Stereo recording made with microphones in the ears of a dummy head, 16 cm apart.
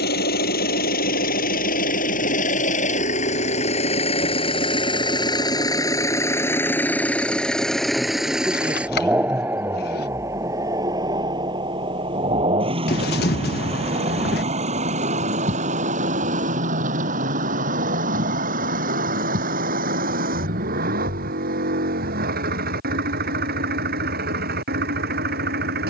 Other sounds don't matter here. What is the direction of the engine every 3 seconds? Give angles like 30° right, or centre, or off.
50° left, 30° left, centre, 20° right, 30° right, 40° right, 50° right, 60° right, 60° right.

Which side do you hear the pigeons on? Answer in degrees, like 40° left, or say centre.
60° left.